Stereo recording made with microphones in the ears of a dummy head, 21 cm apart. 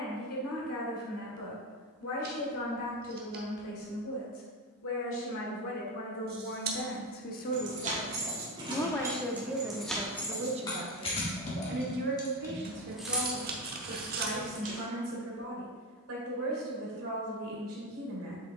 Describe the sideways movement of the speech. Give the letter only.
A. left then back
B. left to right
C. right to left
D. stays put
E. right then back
B.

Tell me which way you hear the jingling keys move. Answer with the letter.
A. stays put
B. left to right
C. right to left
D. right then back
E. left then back
E.